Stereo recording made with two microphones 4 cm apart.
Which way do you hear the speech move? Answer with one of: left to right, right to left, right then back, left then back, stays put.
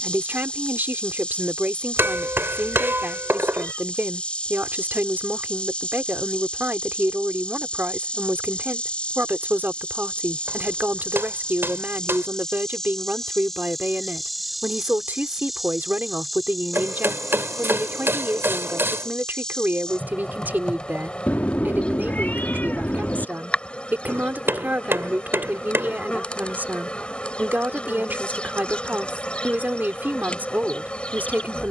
stays put.